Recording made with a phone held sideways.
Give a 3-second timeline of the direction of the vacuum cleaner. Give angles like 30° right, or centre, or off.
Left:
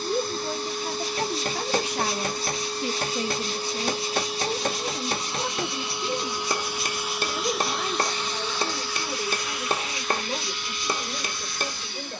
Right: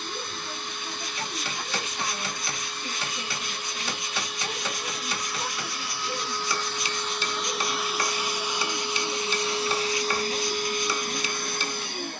40° left, 30° left, centre, 40° right.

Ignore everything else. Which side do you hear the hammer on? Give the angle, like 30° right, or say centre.
50° left.